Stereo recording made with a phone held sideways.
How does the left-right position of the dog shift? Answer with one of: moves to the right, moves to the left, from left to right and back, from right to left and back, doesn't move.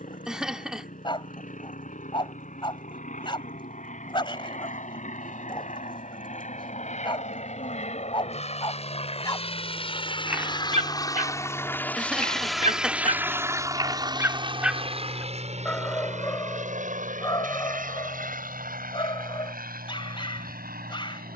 from left to right and back.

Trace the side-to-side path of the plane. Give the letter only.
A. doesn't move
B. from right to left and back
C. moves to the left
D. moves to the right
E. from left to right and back
D.